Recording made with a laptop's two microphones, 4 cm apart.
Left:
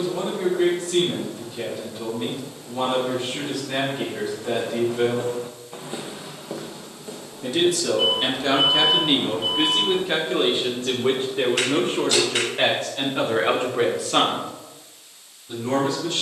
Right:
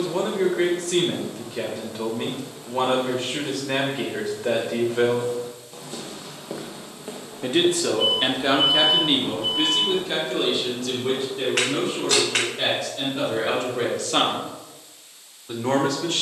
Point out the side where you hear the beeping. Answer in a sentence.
You can hear the beeping on the left.